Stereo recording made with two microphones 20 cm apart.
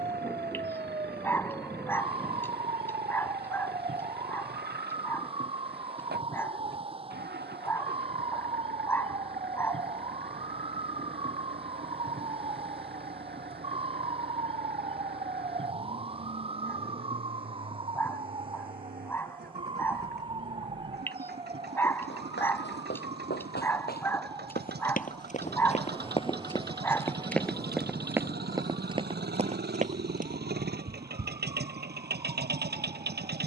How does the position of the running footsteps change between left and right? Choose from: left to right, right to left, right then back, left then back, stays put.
left to right.